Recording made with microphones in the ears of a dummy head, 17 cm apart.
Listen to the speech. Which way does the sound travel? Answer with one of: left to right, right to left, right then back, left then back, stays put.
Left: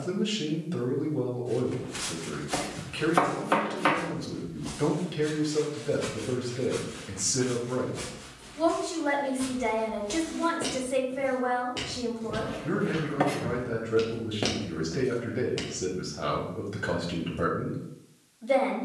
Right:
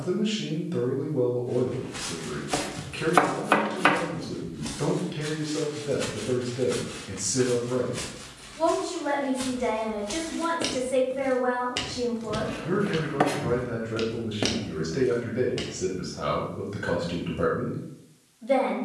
stays put.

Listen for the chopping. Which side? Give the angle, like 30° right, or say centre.
20° right.